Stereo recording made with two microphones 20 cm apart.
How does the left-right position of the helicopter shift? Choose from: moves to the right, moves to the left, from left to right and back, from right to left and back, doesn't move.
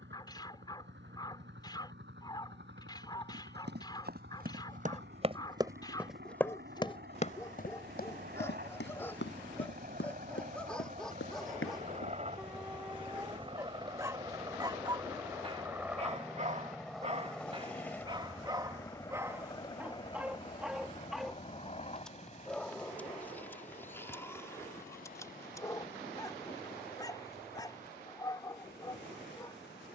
moves to the left.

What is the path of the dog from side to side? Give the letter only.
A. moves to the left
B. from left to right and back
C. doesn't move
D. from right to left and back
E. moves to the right
B.